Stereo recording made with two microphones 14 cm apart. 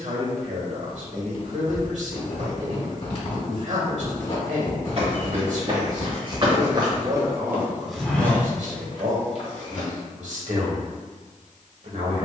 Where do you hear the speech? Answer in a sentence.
In this clip you hear the speech on the right.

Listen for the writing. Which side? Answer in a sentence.
In this clip you hear the writing on the left.